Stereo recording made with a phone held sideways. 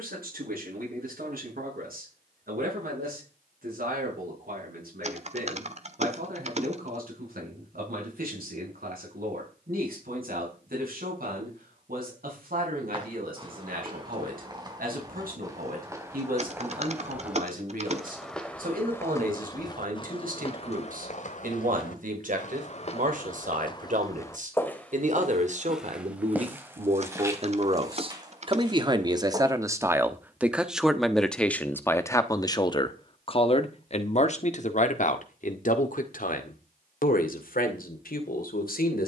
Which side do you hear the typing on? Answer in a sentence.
You can hear the typing on the right.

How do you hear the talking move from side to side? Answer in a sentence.
You can hear the talking go from the right side to the left.